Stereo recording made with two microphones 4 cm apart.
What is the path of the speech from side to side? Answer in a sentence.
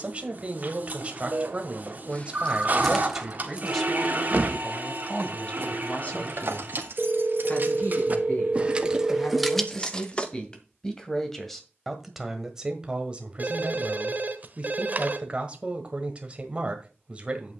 You can hear the speech move from right to left and back again.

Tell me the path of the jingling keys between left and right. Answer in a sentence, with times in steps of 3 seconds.
You can hear the jingling keys on the left from 0 s, on the right from 3 s, in the centre from 9 s and not at all from 12 s.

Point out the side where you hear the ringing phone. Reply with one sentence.
In this clip you hear the ringing phone on the right.